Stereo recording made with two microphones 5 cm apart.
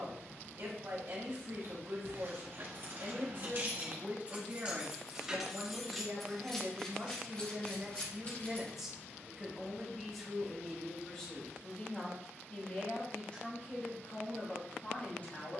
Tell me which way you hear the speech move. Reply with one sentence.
You can hear the speech go from the right side to the left.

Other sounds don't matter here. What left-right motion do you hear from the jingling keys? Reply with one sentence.
You can hear the jingling keys travel towards the left.